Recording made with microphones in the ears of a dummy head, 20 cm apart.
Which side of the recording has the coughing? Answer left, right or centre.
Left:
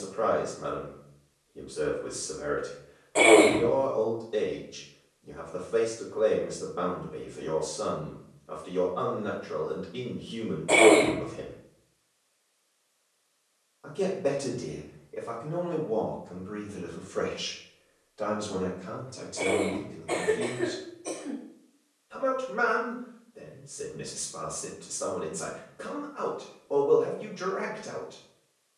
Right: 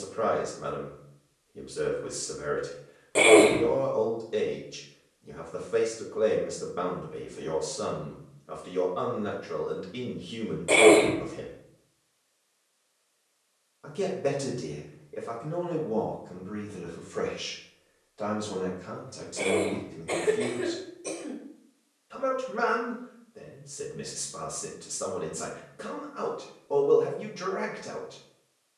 right.